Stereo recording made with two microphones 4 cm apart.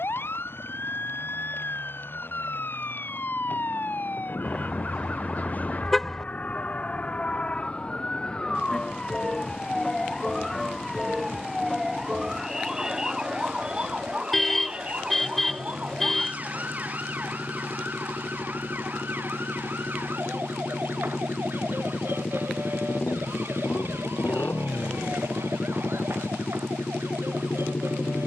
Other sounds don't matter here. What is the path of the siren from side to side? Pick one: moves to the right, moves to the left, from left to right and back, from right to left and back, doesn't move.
moves to the right.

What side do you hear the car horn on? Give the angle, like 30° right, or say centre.
10° left.